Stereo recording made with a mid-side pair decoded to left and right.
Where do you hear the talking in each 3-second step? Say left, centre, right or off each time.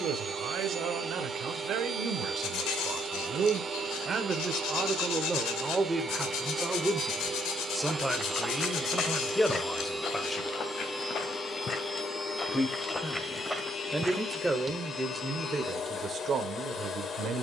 right, right, centre, centre, centre, right.